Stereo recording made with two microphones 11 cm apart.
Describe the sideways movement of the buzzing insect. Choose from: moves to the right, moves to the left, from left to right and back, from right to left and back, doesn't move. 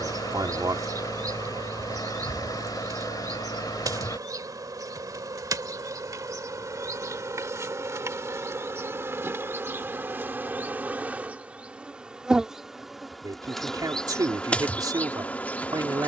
moves to the left.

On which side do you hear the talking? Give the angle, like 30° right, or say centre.
40° right.